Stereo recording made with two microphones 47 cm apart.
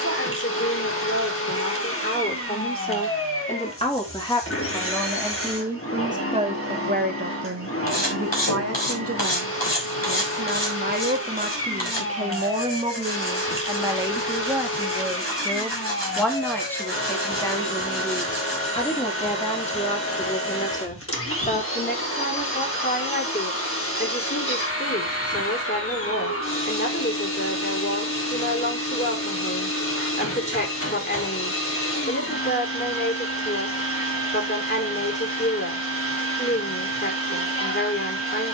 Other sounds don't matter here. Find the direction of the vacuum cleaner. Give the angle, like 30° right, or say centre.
30° left.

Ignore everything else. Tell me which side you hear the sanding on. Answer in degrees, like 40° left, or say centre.
70° left.